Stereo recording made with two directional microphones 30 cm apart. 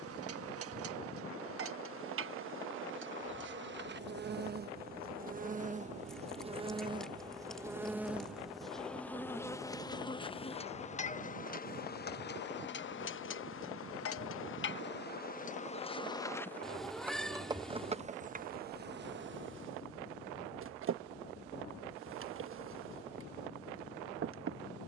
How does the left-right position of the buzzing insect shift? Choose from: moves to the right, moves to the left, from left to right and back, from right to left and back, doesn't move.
from right to left and back.